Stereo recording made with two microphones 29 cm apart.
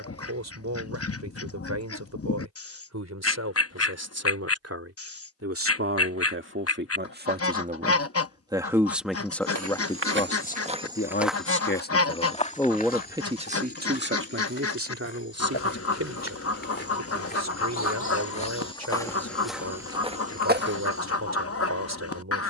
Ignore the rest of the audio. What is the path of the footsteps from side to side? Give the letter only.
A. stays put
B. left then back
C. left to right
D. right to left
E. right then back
B.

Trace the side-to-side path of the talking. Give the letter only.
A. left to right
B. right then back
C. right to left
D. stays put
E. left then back
E.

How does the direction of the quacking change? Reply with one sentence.
In this clip you hear the quacking stay in one place.